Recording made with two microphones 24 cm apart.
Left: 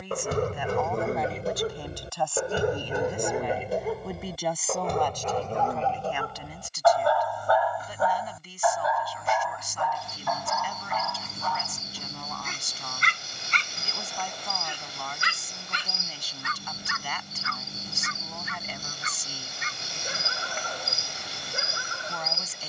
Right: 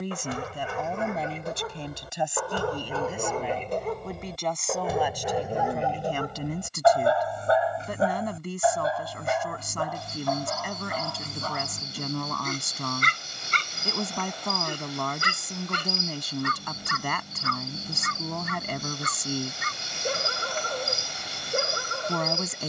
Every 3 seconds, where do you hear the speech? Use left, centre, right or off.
right, centre, right, right, right, right, right, right.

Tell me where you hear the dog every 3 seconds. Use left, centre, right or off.
left, centre, right, right, right, right, right, right.